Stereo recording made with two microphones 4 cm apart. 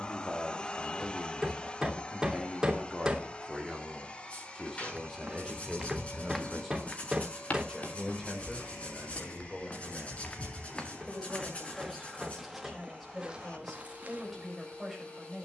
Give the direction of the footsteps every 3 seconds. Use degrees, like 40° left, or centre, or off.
off, 30° right, 30° left, 20° left, 20° right.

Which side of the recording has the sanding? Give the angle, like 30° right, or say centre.
30° left.